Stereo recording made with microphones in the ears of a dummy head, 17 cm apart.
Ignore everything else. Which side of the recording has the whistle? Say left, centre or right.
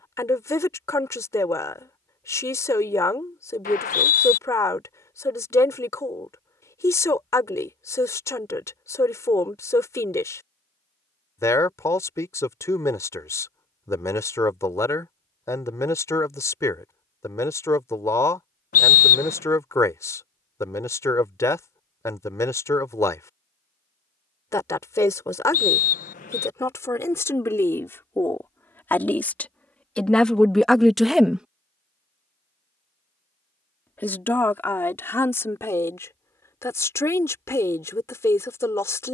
left.